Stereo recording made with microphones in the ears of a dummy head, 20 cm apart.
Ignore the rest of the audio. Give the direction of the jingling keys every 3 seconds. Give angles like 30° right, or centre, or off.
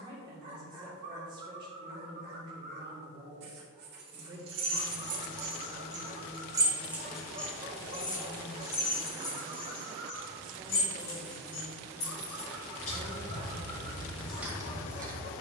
off, 60° right, 10° left, 40° left, 20° left.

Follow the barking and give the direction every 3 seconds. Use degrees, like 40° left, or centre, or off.
50° right, 50° right, 50° right, 30° right, 20° left.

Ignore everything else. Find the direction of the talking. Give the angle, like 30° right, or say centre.
20° right.